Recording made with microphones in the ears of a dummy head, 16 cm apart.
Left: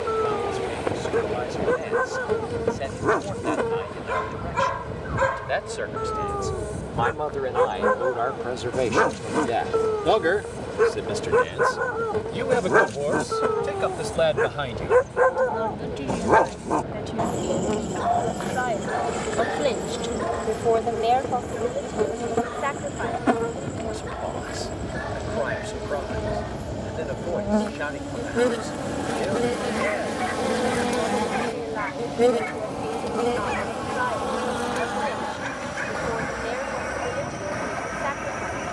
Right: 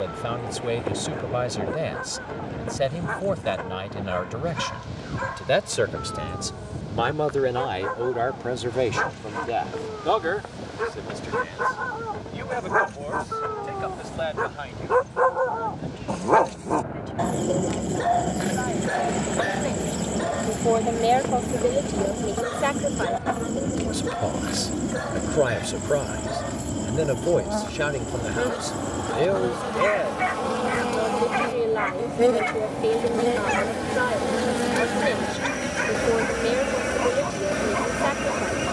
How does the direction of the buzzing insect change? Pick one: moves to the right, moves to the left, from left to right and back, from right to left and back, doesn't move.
moves to the right.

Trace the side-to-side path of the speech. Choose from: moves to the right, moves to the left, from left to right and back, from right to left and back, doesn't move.
from right to left and back.